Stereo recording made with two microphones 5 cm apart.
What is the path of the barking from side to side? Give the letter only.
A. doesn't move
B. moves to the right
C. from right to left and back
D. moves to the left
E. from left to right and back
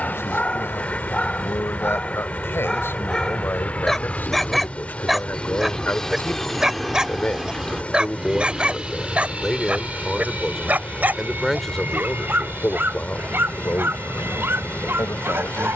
B.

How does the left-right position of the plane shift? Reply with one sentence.
You can hear the plane go from the left side to the right.